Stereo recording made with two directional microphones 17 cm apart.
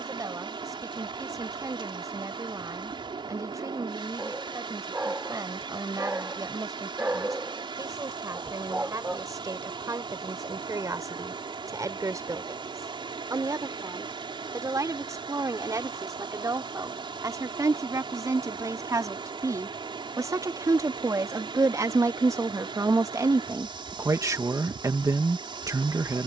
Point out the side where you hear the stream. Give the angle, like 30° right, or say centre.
30° right.